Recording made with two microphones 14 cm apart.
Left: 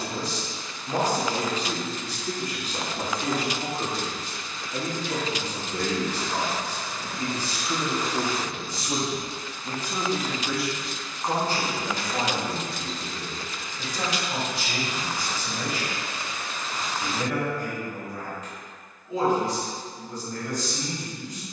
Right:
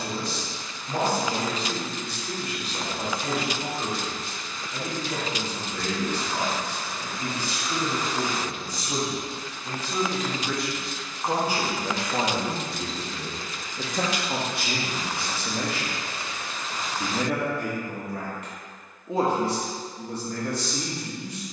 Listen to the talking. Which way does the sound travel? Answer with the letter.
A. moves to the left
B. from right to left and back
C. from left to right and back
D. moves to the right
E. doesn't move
D.